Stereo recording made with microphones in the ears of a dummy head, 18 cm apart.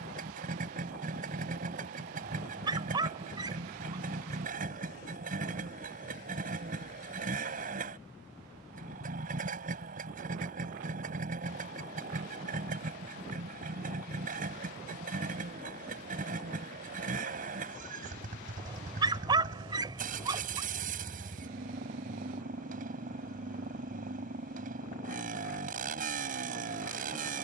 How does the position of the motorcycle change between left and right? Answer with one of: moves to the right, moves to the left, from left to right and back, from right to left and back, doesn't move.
doesn't move.